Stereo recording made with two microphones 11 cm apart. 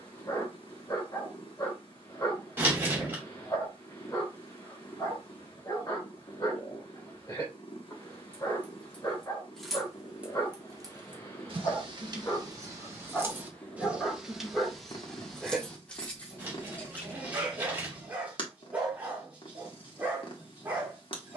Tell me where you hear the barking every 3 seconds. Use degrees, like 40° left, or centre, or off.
30° left, 30° left, 30° left, 30° left, 10° left, 10° right, 20° right.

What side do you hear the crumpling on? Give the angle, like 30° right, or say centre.
20° right.